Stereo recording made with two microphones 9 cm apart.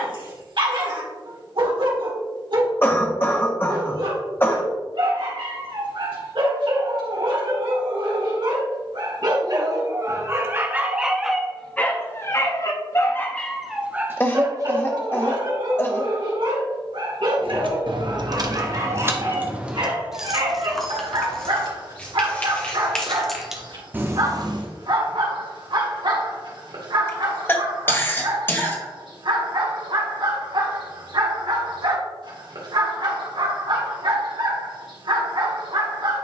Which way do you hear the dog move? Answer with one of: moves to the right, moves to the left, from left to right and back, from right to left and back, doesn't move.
from right to left and back.